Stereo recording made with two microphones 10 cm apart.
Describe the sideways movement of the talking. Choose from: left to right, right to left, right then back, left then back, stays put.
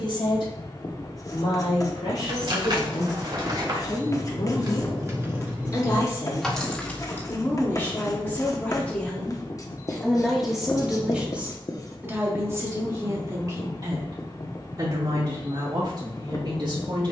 left to right.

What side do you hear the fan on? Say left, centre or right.
left.